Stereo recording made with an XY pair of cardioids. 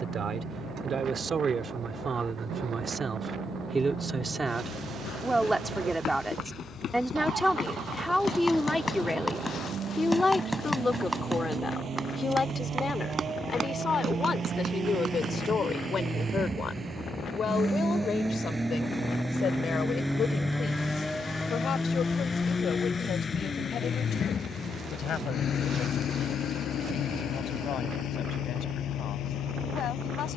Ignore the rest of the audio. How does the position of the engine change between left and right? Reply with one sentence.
In this clip you hear the engine move to the left.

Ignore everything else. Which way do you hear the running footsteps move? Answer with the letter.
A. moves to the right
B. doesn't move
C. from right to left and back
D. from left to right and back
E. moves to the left
A.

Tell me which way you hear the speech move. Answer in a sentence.
In this clip you hear the speech move from right to left.